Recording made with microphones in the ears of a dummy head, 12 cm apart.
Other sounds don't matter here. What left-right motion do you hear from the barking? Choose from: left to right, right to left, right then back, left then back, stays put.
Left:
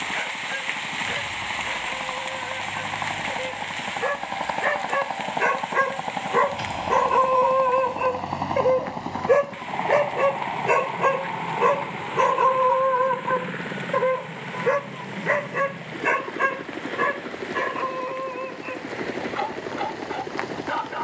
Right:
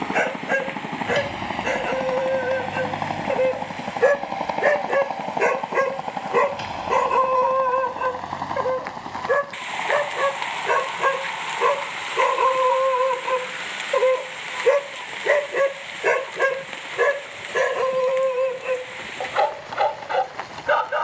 left then back.